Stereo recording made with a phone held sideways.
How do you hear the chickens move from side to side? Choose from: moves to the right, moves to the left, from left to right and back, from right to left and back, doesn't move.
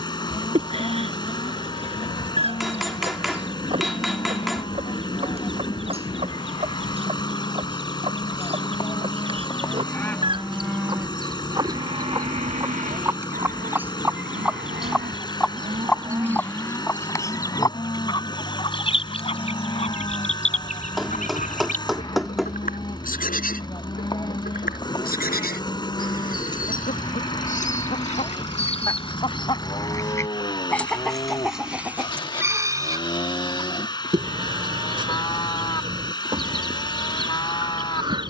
from right to left and back.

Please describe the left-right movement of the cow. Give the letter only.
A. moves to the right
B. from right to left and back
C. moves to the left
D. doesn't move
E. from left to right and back
E.